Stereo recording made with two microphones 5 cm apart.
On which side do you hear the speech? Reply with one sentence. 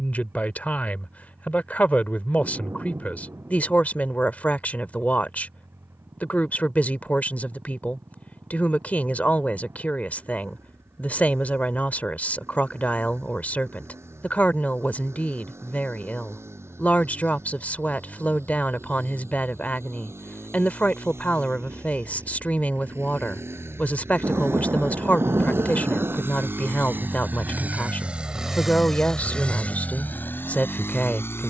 You can hear the speech on the left.